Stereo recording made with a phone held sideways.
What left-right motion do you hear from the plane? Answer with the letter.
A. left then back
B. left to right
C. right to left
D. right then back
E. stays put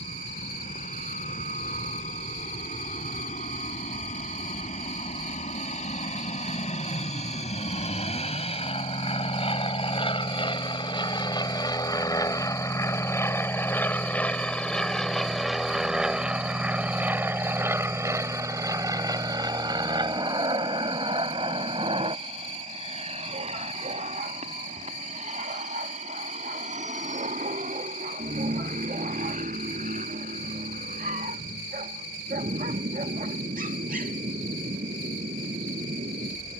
B.